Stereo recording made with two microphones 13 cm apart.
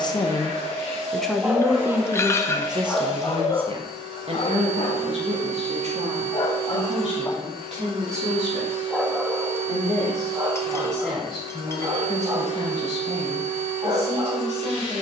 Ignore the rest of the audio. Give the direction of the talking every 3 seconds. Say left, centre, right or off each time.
centre, right, right, right, right.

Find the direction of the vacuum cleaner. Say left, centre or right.
right.